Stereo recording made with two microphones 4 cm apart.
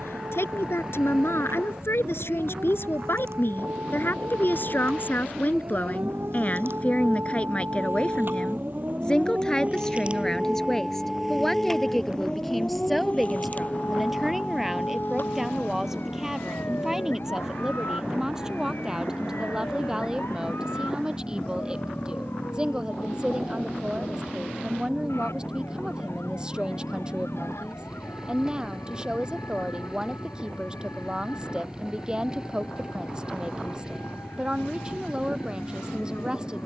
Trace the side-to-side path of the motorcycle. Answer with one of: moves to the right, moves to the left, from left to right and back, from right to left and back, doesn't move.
doesn't move.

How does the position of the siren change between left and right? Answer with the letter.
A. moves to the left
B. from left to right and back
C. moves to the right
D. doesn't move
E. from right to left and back
A.